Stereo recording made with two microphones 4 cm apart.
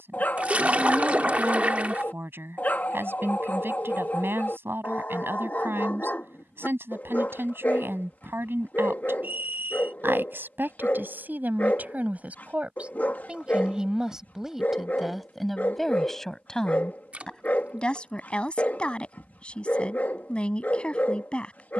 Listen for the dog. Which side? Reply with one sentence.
In this clip you hear the dog on the left.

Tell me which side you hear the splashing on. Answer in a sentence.
In this clip you hear the splashing on the right.